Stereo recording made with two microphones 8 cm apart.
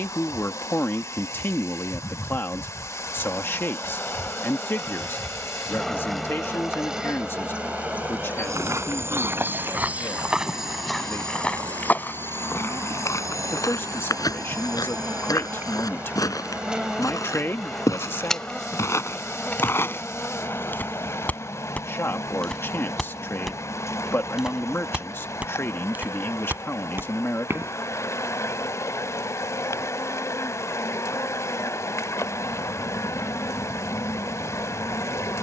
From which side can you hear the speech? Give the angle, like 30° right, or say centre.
30° left.